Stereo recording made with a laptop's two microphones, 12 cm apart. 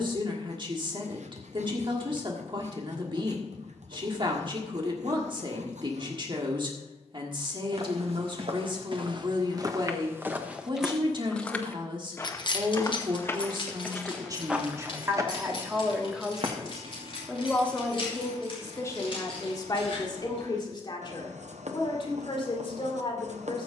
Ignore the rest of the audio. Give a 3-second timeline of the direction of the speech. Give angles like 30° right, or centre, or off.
40° right, 40° right, 40° right, 40° right, 40° right, centre, 30° left, 40° left.